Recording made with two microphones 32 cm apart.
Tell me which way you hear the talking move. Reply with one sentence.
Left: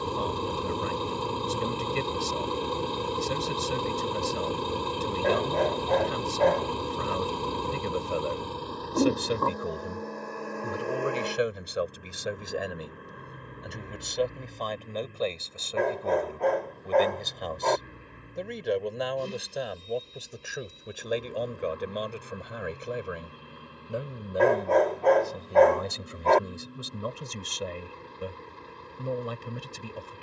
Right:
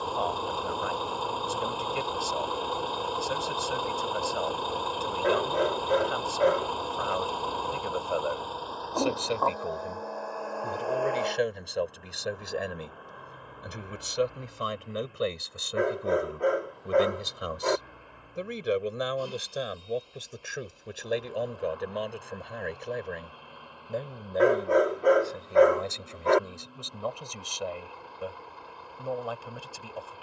In this clip you hear the talking go right and come back.